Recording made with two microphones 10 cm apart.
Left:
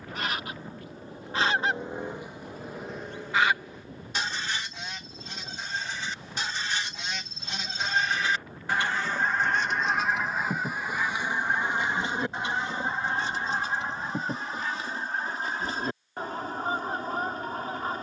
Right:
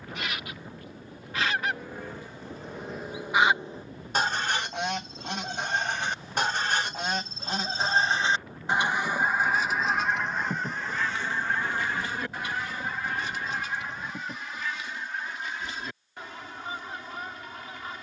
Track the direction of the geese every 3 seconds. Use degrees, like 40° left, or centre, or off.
30° left, 50° right, 40° right, 10° left, 30° left, 40° left.